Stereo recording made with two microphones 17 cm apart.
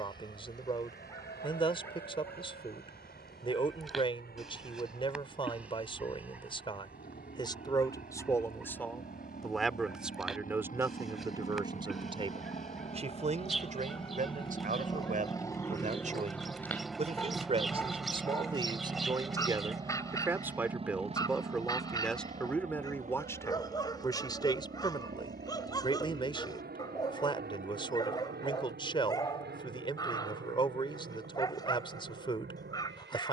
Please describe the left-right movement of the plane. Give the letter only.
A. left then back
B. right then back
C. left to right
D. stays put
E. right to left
C.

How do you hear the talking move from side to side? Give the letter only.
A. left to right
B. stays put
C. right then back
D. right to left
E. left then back
C.